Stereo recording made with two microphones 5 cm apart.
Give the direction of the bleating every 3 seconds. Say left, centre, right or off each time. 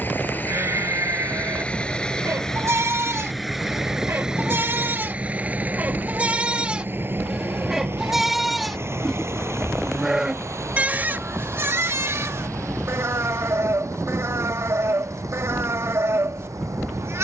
right, right, centre, right, right, right.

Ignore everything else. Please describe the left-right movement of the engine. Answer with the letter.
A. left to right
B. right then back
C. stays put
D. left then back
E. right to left
A.